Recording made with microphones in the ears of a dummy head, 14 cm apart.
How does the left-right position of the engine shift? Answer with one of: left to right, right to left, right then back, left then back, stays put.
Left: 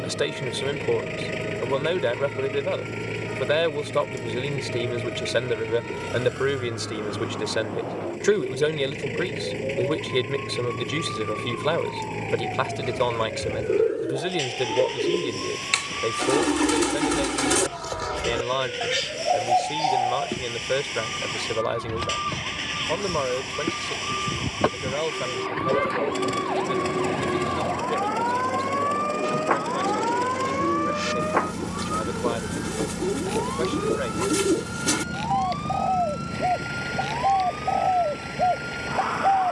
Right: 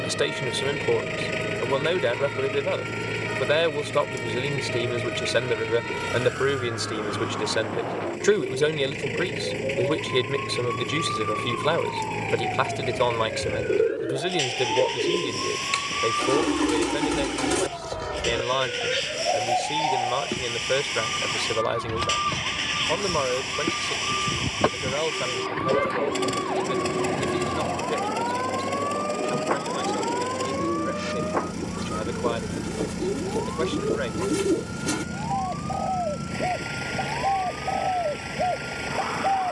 stays put.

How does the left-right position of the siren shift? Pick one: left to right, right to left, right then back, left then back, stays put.
right to left.